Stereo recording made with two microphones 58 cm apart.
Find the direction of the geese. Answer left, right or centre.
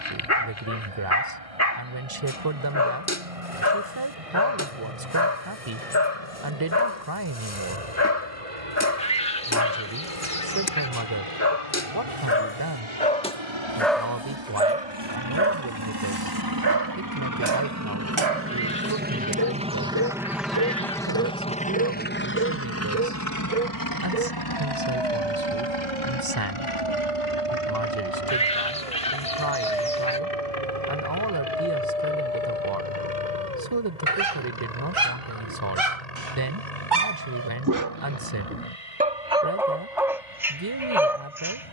centre.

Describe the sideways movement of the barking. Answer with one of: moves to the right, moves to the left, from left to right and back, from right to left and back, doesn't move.
from left to right and back.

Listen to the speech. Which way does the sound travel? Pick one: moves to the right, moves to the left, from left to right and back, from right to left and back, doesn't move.
doesn't move.